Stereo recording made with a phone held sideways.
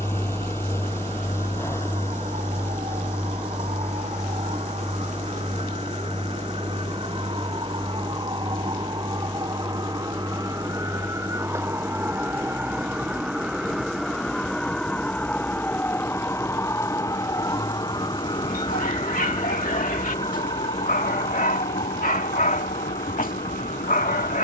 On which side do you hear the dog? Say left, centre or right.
left.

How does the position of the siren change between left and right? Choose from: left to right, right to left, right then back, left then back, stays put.
right to left.